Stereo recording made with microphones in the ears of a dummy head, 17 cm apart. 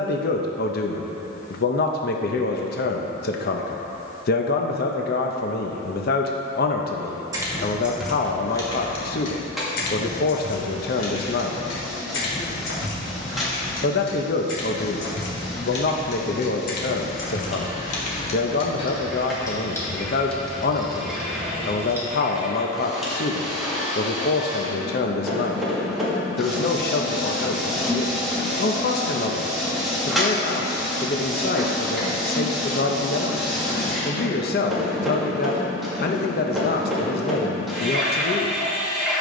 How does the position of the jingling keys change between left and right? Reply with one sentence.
In this clip you hear the jingling keys move from right to left and back again.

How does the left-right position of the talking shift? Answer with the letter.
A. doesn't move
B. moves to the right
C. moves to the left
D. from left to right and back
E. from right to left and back
A.